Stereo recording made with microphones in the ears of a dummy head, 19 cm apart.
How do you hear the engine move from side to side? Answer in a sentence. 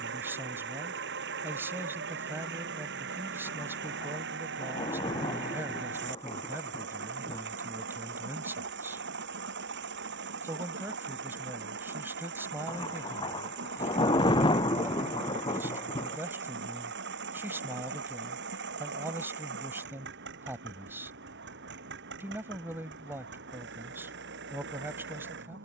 In this clip you hear the engine stay put.